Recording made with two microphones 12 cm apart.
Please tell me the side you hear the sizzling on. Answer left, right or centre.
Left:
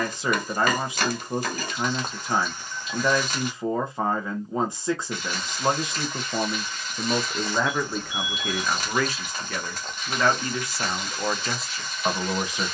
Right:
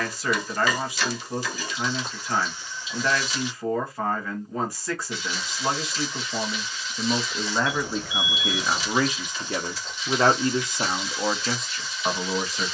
left.